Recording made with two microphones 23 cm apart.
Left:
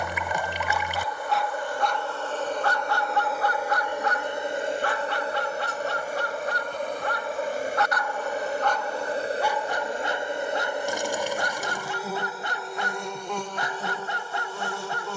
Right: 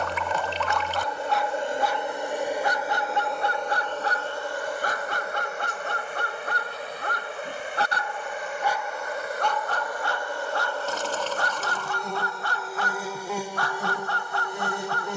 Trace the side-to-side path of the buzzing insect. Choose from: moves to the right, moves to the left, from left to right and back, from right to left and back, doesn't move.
from right to left and back.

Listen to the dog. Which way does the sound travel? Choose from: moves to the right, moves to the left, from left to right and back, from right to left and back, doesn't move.
from left to right and back.